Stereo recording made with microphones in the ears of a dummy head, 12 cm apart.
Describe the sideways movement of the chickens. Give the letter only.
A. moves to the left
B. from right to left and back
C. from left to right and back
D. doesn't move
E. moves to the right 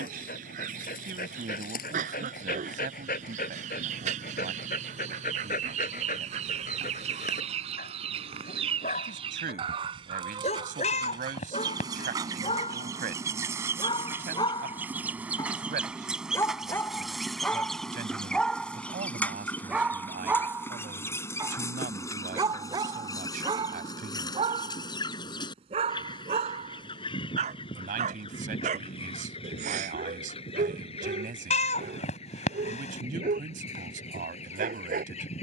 A.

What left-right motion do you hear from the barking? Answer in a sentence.
In this clip you hear the barking travel towards the right.